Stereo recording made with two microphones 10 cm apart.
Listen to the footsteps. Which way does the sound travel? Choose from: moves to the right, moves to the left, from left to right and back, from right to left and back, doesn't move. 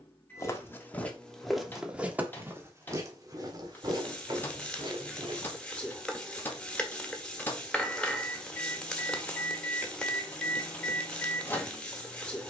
moves to the right.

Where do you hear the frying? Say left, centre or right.
centre.